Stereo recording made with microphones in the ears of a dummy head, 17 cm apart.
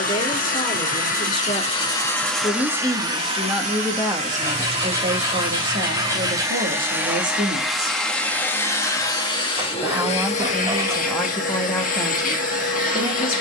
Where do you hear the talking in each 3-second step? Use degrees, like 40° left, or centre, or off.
20° left, 20° right, 50° right, centre, 20° left.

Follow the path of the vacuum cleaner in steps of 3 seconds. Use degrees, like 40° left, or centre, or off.
30° left, 30° right, centre, 40° left, 40° left.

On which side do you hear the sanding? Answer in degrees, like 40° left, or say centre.
20° right.